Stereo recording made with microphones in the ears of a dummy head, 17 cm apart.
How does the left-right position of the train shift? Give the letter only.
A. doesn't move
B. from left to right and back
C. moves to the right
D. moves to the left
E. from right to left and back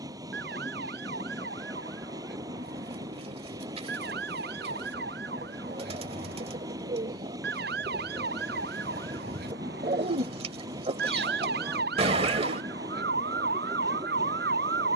A.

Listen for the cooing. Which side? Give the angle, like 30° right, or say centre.
30° right.